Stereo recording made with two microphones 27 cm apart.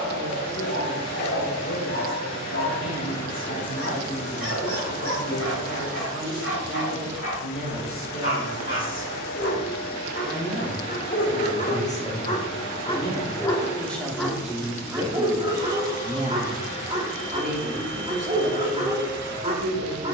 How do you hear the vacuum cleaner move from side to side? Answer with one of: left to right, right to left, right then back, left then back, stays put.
stays put.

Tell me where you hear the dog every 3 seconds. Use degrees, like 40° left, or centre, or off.
50° left, 50° left, 50° left, 40° left, 10° left, 20° right, 20° right.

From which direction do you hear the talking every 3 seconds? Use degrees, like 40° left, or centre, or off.
60° left, 60° left, 50° left, 30° left, 10° left, 20° right, 50° right.